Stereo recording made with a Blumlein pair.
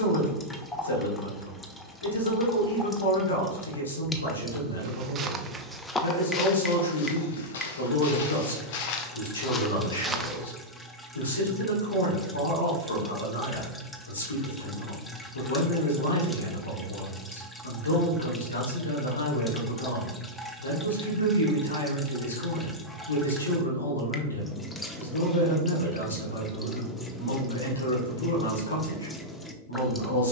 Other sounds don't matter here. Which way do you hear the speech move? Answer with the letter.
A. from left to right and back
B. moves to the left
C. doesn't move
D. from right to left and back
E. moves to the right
C.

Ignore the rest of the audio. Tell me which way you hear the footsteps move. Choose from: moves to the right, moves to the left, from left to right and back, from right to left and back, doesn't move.
from right to left and back.